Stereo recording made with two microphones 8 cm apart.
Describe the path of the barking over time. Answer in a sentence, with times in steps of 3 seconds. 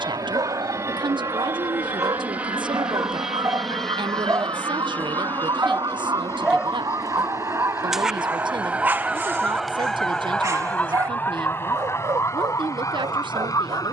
You can hear the barking on the right from 0 s, in the centre from 6 s and on the right from 9 s.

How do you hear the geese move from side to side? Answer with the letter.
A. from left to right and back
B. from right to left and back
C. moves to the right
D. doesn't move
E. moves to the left
E.